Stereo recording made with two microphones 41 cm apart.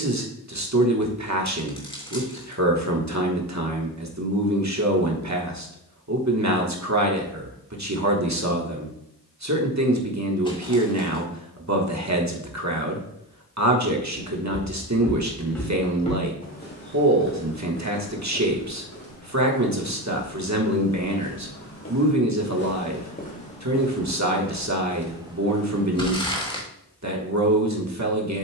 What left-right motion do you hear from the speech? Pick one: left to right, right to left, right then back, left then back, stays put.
stays put.